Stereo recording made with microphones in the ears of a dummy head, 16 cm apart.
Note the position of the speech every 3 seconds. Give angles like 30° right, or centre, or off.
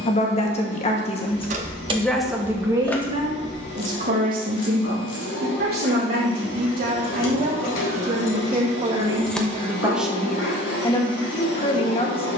20° left, 50° right, 50° right, 10° left.